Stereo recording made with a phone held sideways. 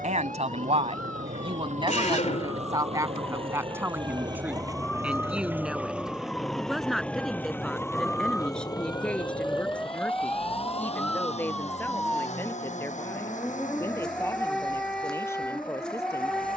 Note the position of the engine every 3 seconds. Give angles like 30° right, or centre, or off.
50° right, 20° right, 10° left, 40° left, 50° left, 60° left.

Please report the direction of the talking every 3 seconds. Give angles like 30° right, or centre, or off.
40° right, 10° right, centre, 10° left, 10° left, 20° left.